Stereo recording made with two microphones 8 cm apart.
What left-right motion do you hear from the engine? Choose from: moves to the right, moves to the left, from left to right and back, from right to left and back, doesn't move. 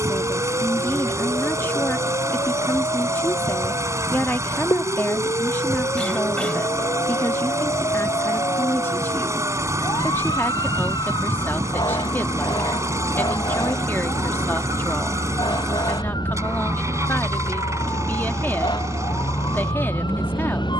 doesn't move.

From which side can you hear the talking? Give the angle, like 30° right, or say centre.
30° left.